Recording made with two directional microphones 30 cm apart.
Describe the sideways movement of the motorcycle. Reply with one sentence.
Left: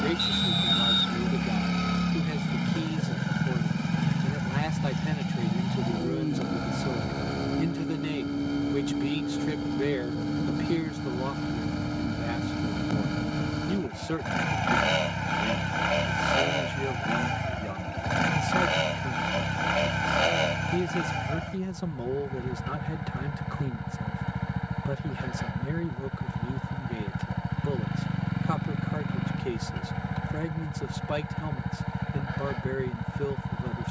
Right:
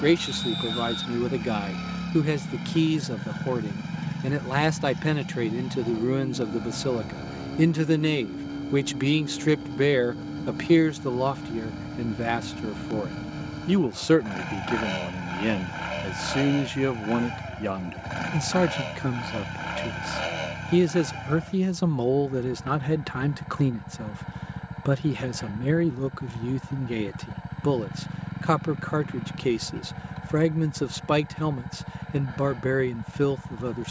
You can hear the motorcycle stay put.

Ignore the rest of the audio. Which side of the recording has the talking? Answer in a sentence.
In this clip you hear the talking on the right.